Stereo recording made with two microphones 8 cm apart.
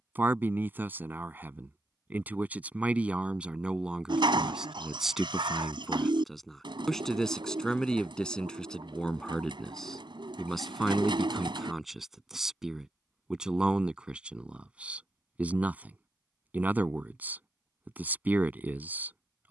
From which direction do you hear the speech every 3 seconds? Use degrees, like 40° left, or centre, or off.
20° right, 10° right, 10° left, centre, 10° right, 20° right, 20° right.